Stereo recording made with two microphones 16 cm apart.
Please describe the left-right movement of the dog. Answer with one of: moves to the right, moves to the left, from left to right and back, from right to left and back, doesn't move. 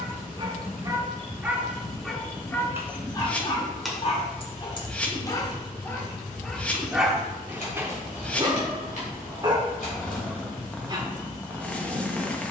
from right to left and back.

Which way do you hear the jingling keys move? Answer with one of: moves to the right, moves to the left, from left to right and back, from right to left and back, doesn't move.
moves to the left.